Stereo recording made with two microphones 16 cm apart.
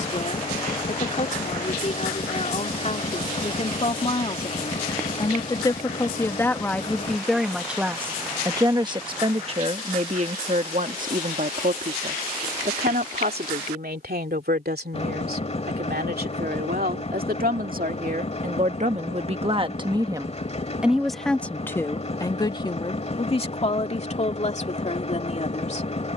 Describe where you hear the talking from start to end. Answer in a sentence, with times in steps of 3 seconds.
In this clip you hear the talking on the left from 0 s, in the centre from 6 s, on the right from 9 s and on the left from 21 s.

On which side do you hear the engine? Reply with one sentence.
In this clip you hear the engine on the left.